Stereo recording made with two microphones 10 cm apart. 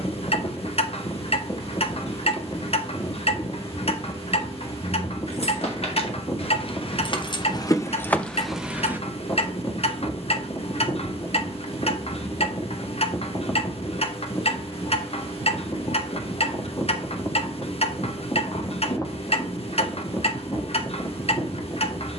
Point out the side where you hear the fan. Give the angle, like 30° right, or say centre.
40° left.